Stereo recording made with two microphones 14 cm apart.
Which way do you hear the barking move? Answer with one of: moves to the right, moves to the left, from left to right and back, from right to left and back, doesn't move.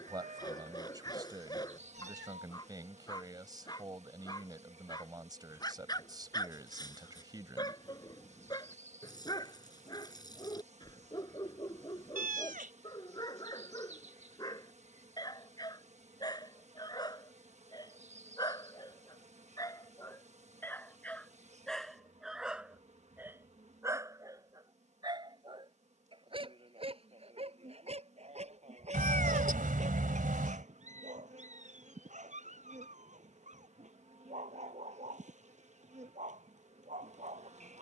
moves to the right.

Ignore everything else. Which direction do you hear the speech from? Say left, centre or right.
right.